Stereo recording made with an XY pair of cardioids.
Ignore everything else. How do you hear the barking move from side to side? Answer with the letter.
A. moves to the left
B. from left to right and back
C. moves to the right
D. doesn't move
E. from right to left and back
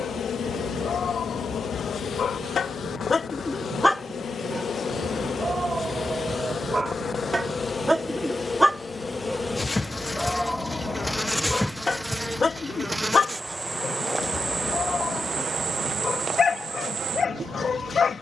B.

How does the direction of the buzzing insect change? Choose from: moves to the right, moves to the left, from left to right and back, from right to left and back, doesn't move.
moves to the right.